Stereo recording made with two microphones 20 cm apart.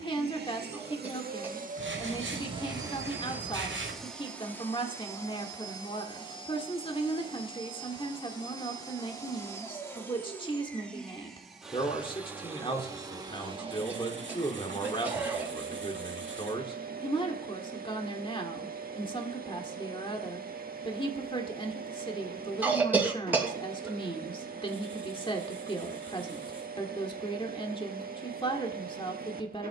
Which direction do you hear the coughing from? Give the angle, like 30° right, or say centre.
10° right.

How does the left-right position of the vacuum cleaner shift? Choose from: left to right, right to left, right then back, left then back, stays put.
left then back.